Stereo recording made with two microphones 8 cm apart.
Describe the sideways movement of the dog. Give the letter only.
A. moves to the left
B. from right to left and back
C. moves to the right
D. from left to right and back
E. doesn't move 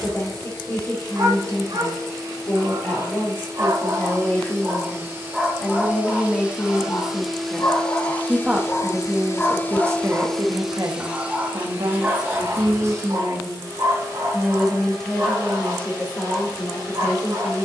B.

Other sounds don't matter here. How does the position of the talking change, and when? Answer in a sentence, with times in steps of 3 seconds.
You can hear the talking on the left from 0 s, in the centre from 6 s, on the right from 9 s and on the left from 15 s.